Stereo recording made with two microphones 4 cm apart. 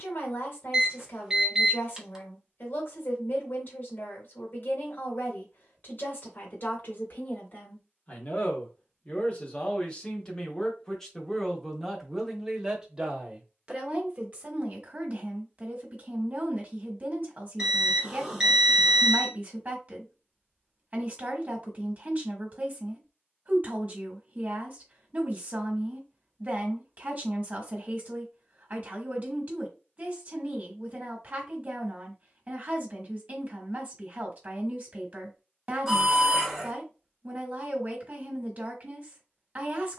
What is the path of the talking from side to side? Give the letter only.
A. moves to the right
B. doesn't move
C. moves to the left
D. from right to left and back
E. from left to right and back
A.